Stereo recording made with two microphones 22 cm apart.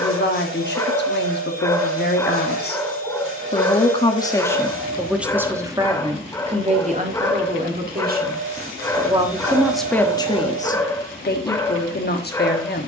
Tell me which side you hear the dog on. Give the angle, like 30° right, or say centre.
10° left.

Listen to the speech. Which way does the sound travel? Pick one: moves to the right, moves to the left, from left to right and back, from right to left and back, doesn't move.
from left to right and back.